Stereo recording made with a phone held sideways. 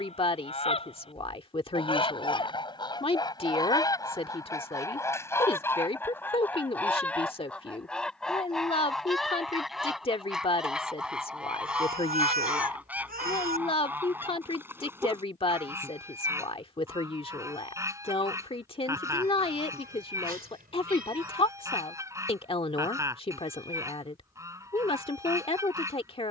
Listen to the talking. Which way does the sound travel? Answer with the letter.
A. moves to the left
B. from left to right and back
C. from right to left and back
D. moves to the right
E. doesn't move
E.